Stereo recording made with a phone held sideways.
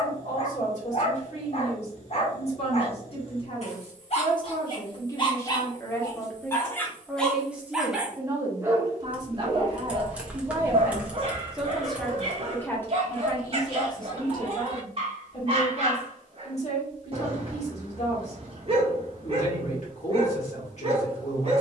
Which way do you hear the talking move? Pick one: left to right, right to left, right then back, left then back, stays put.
right then back.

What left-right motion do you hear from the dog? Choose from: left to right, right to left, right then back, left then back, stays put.
left to right.